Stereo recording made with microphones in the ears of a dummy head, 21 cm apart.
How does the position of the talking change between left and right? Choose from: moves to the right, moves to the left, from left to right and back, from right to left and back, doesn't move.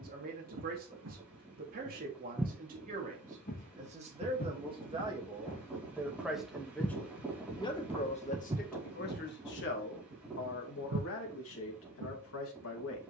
moves to the left.